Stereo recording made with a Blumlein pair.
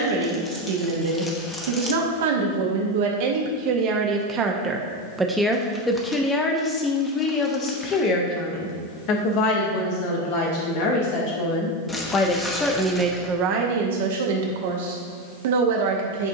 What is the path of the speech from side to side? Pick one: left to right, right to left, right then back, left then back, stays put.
left then back.